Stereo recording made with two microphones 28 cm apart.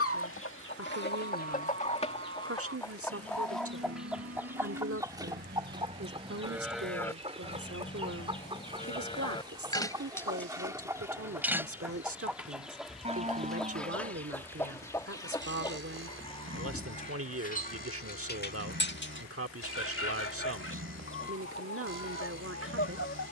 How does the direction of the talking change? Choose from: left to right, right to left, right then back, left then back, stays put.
stays put.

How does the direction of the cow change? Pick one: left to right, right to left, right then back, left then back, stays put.
left then back.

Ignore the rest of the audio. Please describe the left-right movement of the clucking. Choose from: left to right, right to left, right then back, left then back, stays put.
right then back.